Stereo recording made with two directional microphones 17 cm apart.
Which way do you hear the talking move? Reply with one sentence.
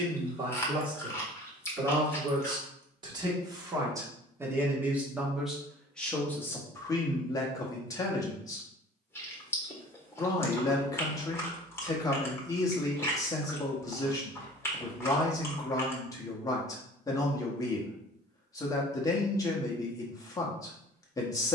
You can hear the talking move to the left.